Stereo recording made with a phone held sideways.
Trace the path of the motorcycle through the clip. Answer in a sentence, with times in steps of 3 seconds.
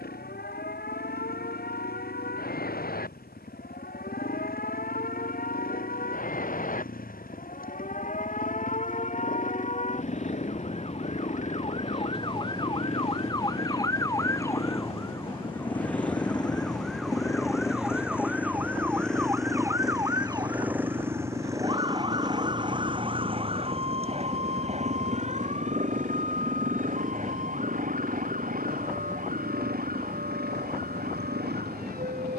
You can hear the motorcycle on the left from 0 s, in the centre from 18 s and on the right from 21 s.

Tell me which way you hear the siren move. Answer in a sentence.
In this clip you hear the siren move from left to right.